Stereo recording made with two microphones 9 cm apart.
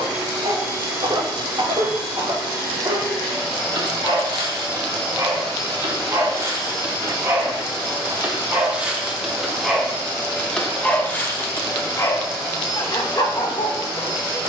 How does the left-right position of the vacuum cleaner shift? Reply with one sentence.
In this clip you hear the vacuum cleaner stay put.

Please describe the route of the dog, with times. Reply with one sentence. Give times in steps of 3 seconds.
You can hear the dog on the right from 0 s, in the centre from 9 s and on the left from 12 s.